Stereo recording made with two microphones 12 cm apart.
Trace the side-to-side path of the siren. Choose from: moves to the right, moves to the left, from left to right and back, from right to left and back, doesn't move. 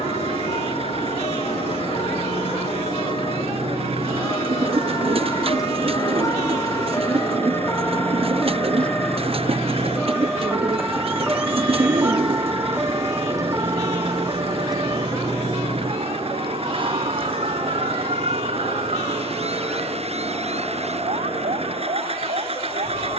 moves to the right.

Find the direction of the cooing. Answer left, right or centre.
right.